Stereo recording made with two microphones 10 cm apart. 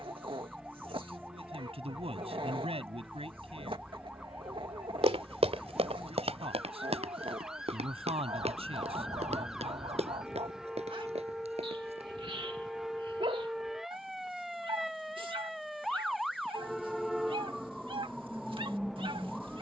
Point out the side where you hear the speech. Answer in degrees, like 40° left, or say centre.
70° right.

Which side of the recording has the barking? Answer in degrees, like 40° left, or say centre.
60° right.